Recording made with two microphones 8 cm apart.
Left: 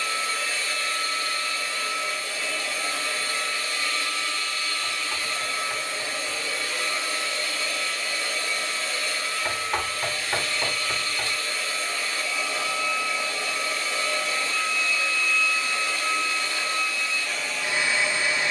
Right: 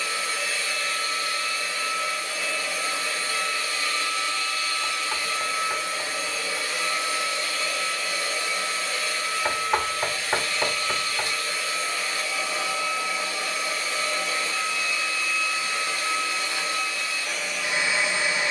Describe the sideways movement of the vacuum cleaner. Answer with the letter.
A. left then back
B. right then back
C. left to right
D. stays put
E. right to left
D.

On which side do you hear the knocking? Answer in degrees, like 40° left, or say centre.
30° right.